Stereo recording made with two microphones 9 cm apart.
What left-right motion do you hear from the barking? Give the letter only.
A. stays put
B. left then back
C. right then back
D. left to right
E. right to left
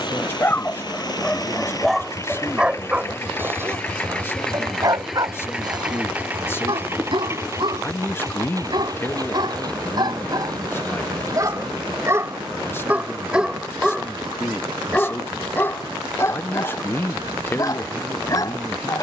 C.